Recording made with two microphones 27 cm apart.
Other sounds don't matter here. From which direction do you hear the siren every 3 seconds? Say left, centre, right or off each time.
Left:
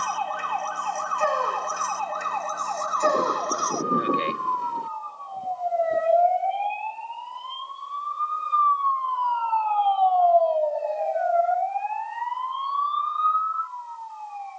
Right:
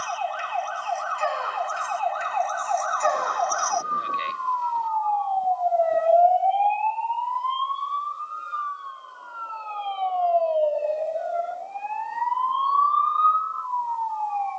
left, left, centre, right, right.